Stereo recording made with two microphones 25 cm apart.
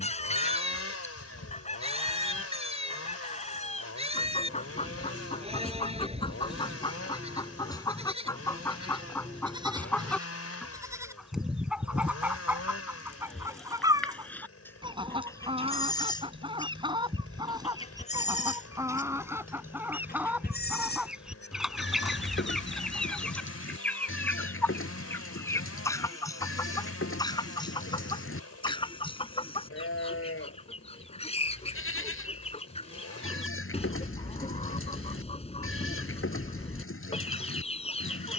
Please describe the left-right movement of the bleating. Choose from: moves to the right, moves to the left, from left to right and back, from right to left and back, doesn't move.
moves to the left.